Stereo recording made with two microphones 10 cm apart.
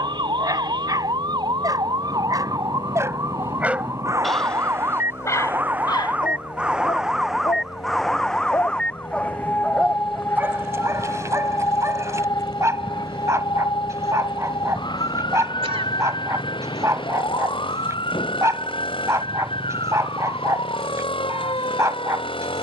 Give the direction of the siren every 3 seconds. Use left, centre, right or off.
right, right, centre, left, left, left, left, left.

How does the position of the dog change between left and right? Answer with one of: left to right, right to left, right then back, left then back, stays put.
left then back.